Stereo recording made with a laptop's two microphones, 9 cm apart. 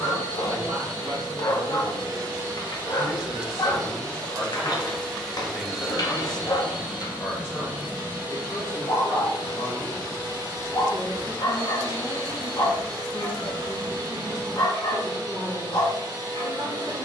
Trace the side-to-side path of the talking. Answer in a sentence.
In this clip you hear the talking move from right to left and back again.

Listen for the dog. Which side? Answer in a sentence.
In this clip you hear the dog on the left.